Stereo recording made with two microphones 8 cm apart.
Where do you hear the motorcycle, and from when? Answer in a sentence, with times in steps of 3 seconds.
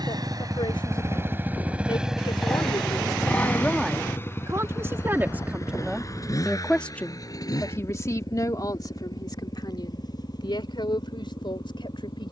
You can hear the motorcycle on the right from 0 s and on the left from 3 s.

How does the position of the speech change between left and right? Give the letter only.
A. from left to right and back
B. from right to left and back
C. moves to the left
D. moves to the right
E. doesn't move
A.